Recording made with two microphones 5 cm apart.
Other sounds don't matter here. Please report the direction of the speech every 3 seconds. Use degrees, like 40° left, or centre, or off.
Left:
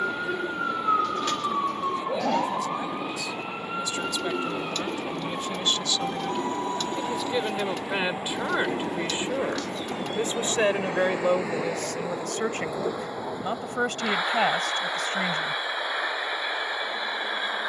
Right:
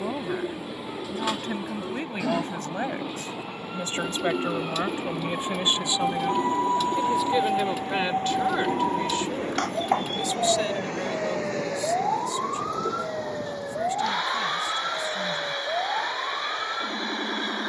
40° right, 30° right, centre, 40° left, 60° left, 60° left.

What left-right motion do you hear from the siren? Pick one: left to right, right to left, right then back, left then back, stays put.
left to right.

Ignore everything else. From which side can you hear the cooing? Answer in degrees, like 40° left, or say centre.
10° right.